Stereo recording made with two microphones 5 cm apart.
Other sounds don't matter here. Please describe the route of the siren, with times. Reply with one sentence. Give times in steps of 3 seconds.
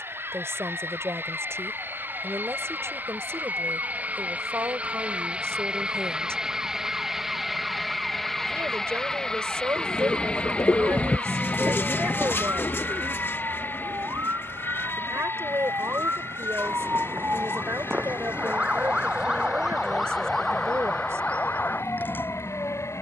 You can hear the siren on the right from 0 s, in the centre from 18 s and on the left from 21 s.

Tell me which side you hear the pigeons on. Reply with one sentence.
You can hear the pigeons on the left.